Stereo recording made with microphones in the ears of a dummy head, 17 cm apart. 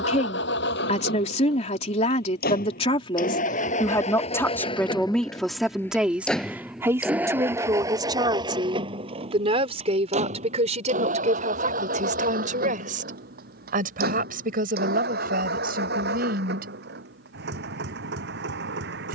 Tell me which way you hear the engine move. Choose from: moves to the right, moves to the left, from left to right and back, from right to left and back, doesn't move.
moves to the right.